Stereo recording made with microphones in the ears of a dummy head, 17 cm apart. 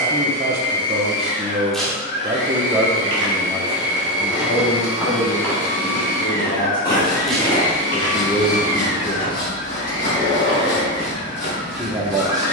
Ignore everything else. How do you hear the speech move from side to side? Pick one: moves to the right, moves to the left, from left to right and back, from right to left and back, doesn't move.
from right to left and back.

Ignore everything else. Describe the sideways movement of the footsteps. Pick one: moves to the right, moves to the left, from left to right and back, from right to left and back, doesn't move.
moves to the left.